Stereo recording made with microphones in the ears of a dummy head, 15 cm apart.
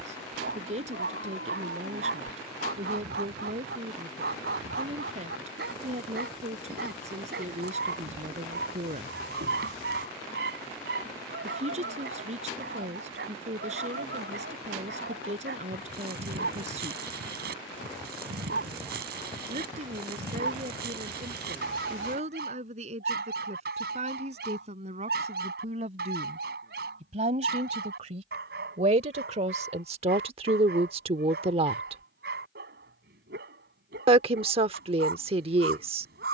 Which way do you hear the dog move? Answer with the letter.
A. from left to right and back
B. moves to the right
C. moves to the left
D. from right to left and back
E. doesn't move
E.